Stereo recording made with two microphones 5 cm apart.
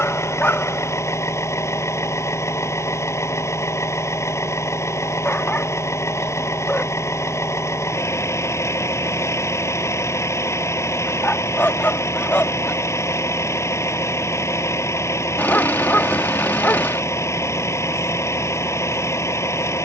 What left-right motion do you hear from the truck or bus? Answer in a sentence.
In this clip you hear the truck or bus stay in one place.